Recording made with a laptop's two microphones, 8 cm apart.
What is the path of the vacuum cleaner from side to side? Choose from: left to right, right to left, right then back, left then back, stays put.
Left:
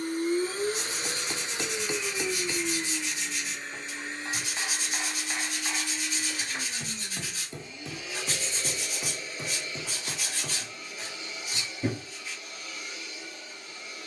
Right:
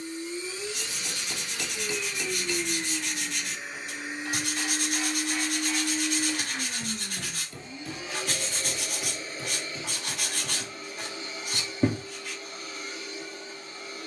left to right.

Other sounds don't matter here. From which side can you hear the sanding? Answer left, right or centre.
right.